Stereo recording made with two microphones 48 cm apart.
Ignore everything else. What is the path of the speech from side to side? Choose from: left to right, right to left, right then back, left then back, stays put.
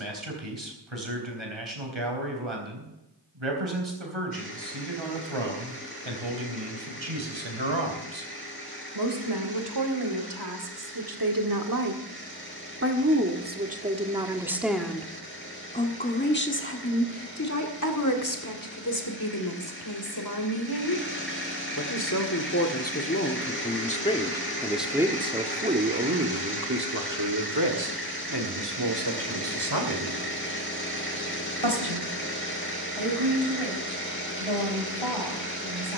left then back.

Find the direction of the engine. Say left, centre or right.
left.